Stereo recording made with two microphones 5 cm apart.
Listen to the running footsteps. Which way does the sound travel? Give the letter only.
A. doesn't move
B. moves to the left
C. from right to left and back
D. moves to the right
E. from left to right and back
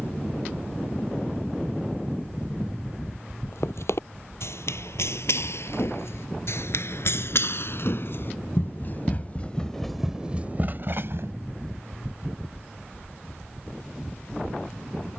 D.